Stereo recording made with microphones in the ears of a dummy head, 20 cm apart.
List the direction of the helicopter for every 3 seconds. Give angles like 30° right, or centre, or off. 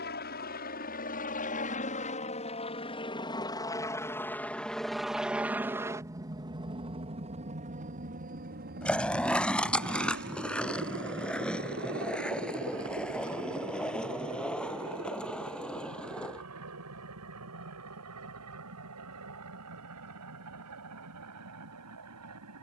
40° left, 10° left, 30° right, 50° right, 70° right, 70° right, 80° right, 80° right.